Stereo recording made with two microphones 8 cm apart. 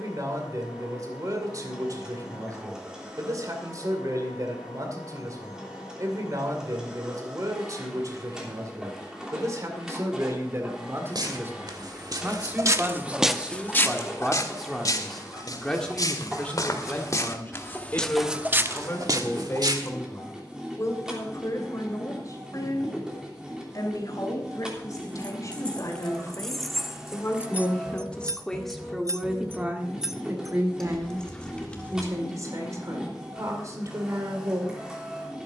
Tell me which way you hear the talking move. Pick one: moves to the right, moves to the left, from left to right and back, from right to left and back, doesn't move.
from right to left and back.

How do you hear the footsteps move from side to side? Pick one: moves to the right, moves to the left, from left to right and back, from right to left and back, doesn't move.
from right to left and back.